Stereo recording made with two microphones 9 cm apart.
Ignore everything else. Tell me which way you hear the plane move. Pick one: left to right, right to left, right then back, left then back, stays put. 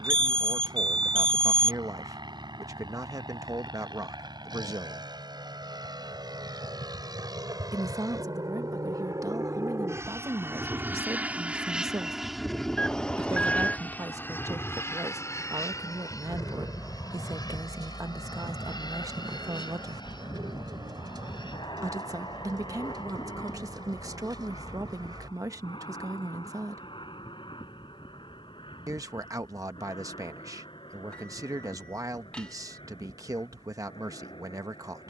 right to left.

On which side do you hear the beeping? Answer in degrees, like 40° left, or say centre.
10° left.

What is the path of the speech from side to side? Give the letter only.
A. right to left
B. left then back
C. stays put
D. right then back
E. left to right
C.